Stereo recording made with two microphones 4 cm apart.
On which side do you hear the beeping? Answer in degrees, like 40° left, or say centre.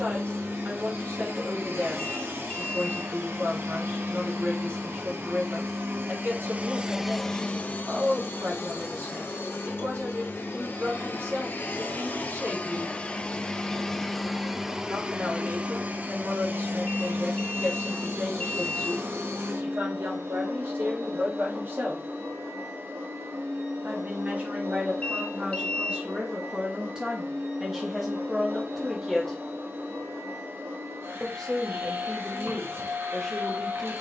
30° left.